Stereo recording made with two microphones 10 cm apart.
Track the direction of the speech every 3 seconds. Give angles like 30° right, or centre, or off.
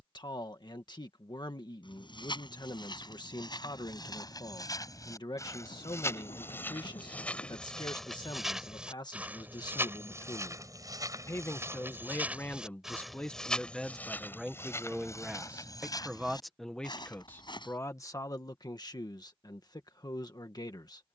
50° left, 50° left, 50° left, 40° left, 10° left, centre, 40° left.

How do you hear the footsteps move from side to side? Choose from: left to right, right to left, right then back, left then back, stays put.
right then back.